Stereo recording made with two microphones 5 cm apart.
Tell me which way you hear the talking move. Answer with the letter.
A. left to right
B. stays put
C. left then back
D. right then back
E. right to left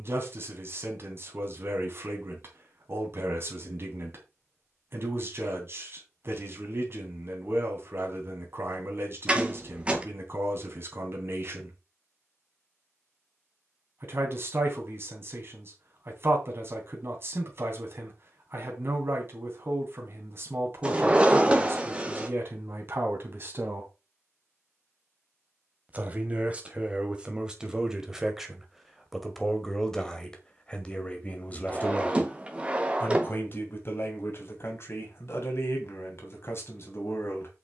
E.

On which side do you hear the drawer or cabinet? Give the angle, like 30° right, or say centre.
20° right.